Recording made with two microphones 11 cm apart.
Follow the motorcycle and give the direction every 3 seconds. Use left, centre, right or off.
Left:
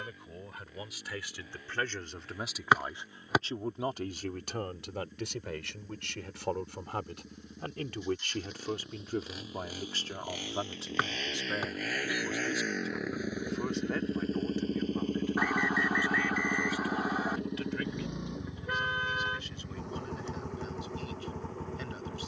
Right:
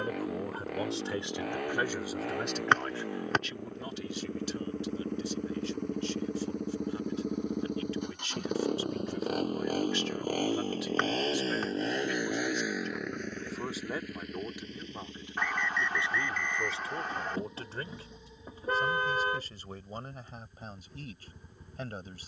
right, right, right, right, centre, left, left, left.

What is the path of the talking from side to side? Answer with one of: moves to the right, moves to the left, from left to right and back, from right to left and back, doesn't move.
from right to left and back.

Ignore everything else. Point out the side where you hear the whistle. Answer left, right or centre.
centre.